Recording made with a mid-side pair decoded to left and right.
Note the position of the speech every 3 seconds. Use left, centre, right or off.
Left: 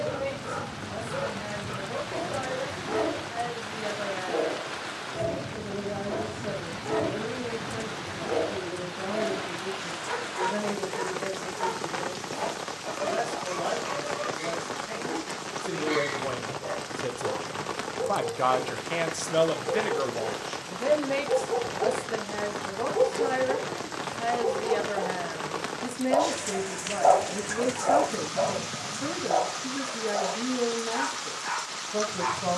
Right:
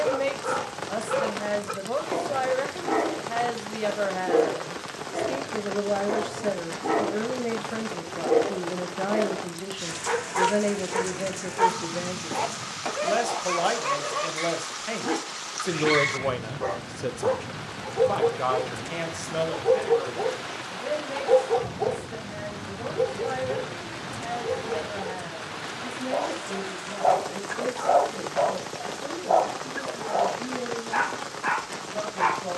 right, right, right, right, right, right, left, left, left, left, left.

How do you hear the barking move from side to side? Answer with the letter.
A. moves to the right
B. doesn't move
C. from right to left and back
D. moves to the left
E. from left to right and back
C.